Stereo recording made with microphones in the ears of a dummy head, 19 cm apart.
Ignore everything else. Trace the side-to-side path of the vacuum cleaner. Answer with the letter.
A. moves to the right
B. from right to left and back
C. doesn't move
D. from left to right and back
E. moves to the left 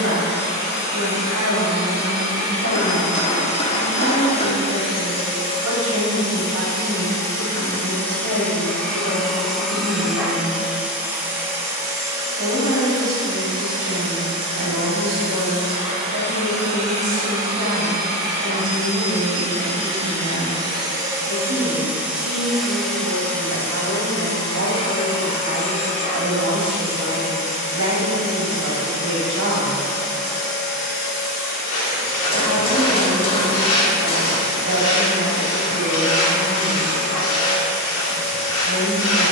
D.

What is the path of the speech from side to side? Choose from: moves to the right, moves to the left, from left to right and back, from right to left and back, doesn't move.
doesn't move.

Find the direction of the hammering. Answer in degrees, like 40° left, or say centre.
30° left.